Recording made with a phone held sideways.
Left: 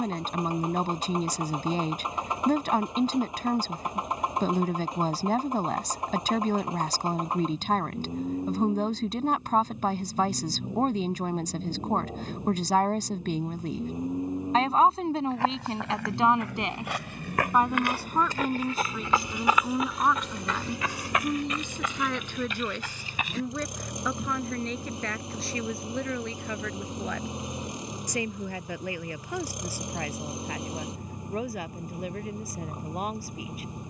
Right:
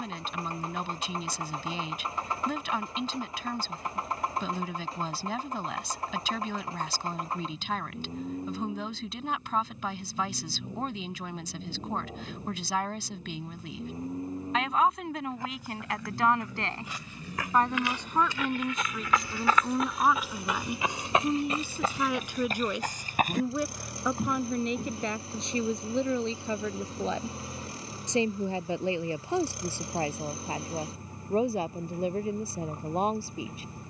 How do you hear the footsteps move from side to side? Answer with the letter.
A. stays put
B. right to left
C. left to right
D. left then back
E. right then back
C.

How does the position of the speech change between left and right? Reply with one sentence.
You can hear the speech move from left to right.